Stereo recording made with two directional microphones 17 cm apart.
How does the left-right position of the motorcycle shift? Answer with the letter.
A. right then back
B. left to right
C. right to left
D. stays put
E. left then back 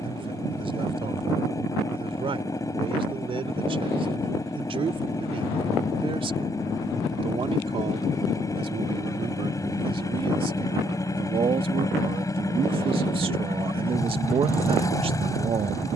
D.